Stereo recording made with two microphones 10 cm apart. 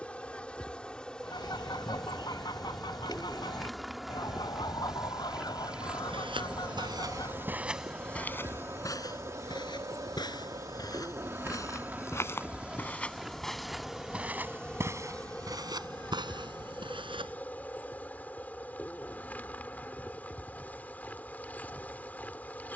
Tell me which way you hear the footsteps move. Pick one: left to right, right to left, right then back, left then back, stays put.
left then back.